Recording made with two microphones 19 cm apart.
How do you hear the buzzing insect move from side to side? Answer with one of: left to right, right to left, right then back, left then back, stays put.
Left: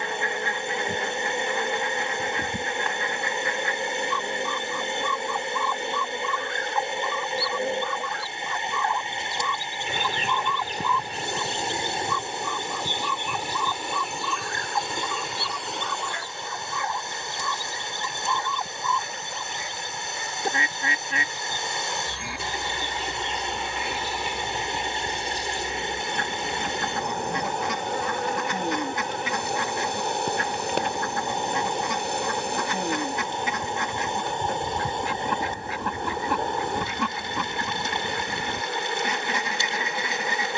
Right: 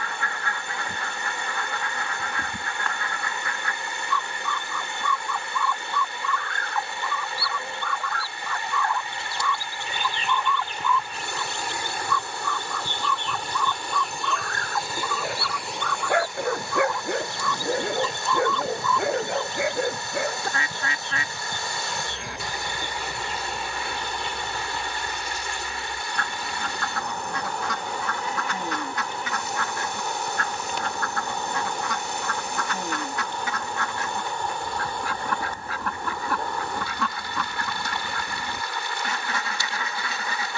right then back.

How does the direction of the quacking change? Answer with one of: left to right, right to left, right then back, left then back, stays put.
stays put.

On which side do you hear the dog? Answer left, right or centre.
right.